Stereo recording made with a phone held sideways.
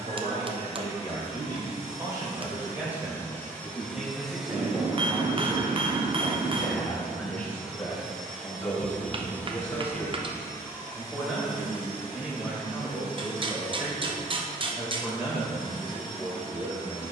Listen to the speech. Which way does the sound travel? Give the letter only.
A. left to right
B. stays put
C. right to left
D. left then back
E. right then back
D.